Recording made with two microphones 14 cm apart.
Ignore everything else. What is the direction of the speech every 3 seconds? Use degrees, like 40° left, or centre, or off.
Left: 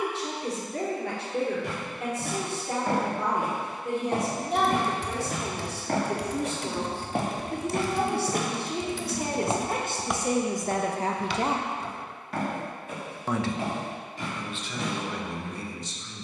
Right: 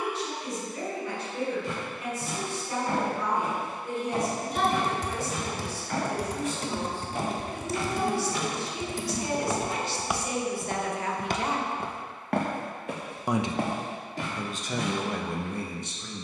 70° left, 70° left, 60° left, 40° left, 30° right, 50° right.